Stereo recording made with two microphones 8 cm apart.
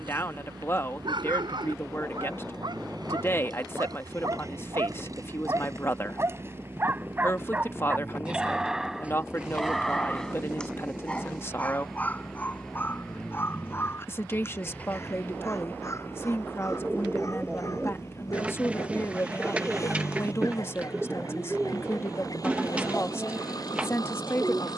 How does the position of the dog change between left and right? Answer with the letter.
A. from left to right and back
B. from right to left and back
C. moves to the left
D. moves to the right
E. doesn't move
C.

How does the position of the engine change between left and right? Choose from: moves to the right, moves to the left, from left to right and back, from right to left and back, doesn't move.
moves to the left.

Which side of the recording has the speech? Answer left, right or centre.
left.